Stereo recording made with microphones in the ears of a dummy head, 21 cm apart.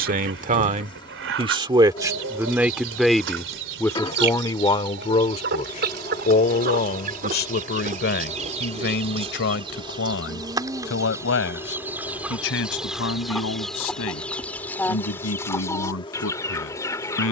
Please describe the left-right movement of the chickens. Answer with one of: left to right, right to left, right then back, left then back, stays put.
right to left.